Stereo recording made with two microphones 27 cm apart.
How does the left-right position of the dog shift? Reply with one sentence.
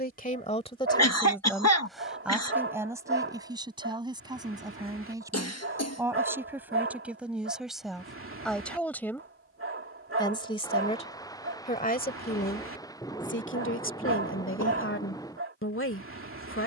In this clip you hear the dog stay put.